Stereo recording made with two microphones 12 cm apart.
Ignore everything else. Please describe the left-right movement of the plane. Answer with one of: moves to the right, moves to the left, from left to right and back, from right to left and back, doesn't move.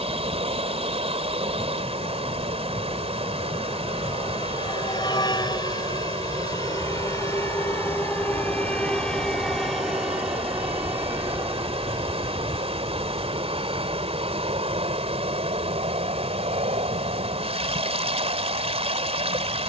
moves to the right.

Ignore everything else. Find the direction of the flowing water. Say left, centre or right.
right.